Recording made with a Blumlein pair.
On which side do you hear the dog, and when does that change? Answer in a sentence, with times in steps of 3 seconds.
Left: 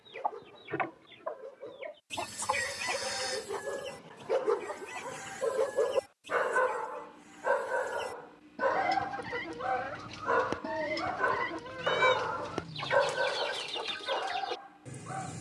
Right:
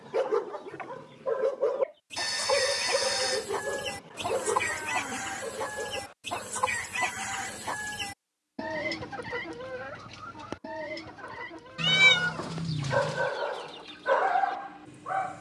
In this clip you hear the dog on the right from 0 s, in the centre from 3 s, on the left from 6 s and in the centre from 12 s.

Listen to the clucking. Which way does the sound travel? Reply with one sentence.
In this clip you hear the clucking move from left to right and back again.